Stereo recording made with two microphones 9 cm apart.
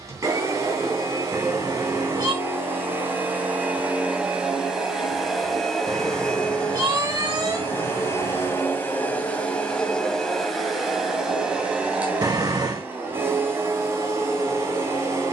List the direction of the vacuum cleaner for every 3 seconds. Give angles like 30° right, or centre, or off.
30° right, 10° right, 20° left, centre, 30° right.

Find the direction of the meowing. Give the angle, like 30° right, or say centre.
40° right.